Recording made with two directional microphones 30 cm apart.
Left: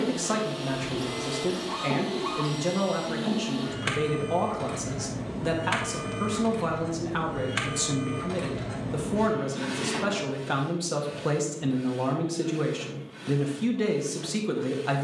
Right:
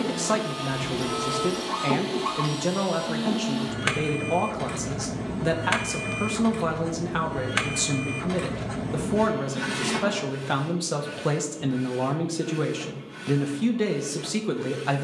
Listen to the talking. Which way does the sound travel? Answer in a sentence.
You can hear the talking stay put.